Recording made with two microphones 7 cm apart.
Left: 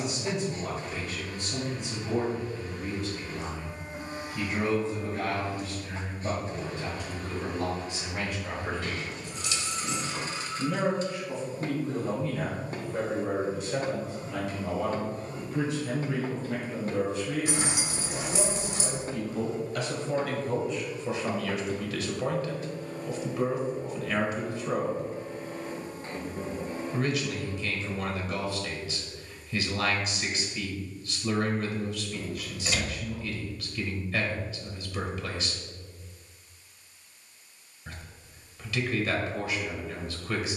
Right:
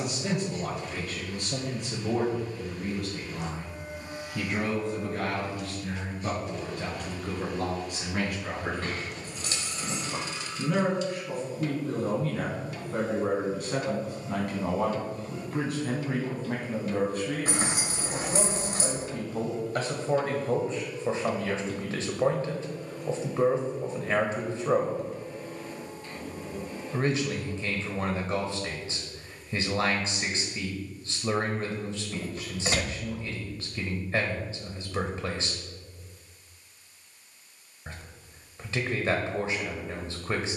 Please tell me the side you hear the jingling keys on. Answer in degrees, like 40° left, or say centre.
40° right.